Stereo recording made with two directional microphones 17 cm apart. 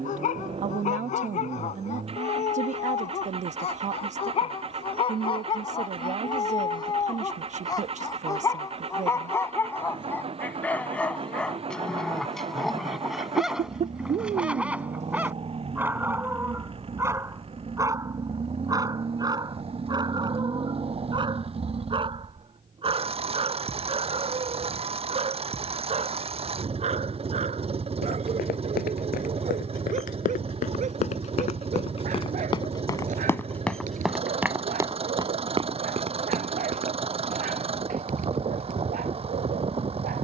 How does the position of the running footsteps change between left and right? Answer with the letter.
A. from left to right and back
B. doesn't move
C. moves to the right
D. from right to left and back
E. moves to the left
C.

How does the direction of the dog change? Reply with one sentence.
In this clip you hear the dog go from the left side to the right.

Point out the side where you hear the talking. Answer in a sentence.
In this clip you hear the talking on the right.